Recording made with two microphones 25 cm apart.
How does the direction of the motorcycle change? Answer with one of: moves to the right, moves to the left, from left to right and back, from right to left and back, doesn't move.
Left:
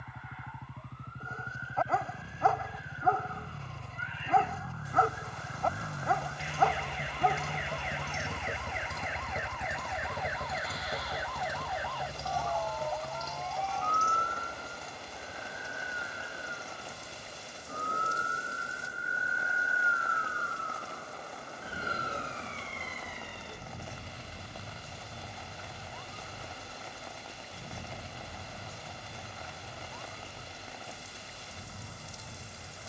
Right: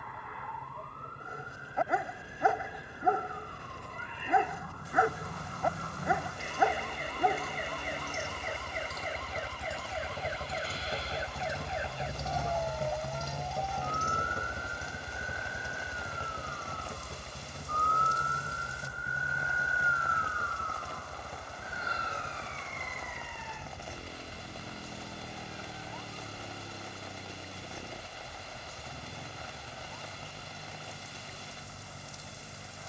moves to the right.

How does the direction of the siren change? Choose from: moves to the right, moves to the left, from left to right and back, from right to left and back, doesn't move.
moves to the left.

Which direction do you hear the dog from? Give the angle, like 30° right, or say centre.
10° right.